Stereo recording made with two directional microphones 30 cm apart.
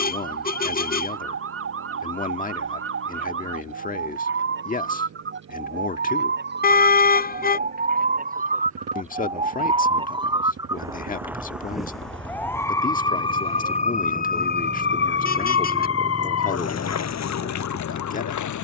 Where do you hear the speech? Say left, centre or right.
left.